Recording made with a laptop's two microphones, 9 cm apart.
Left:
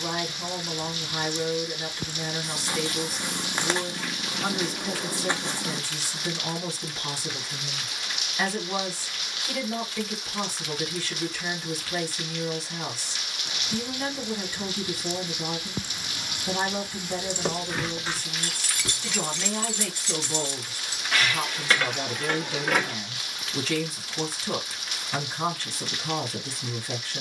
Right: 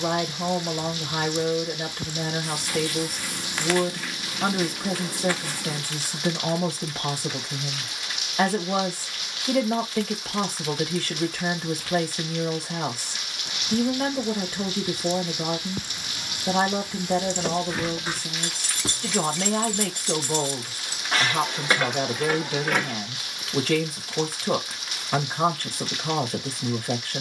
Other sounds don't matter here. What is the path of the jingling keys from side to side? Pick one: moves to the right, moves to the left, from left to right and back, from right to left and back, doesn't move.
from left to right and back.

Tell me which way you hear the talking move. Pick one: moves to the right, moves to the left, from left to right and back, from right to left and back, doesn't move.
doesn't move.